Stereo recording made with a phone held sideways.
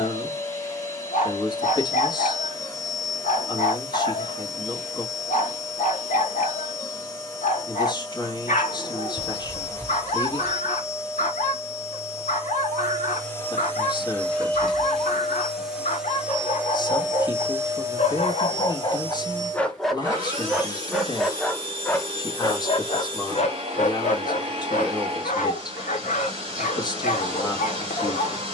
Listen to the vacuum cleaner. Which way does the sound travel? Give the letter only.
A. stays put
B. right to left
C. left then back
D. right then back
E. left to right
E.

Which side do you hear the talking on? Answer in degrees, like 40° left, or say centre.
30° left.